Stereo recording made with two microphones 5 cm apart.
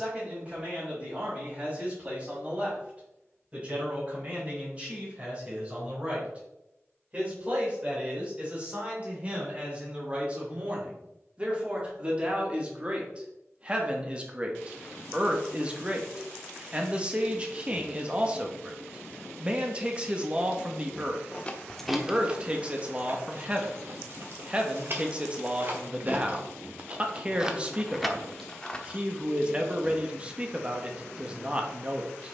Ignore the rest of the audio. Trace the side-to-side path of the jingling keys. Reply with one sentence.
You can hear the jingling keys go right and come back.